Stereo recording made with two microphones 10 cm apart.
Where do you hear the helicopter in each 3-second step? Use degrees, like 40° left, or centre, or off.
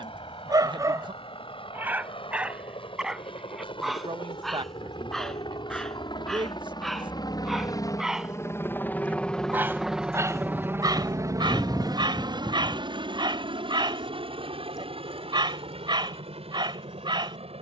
80° left, 70° left, 40° left, 20° right, 50° right, 70° right.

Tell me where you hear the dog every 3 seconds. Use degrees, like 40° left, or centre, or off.
30° right, centre, centre, 40° right, 50° right, 50° right.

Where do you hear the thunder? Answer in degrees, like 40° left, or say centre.
30° left.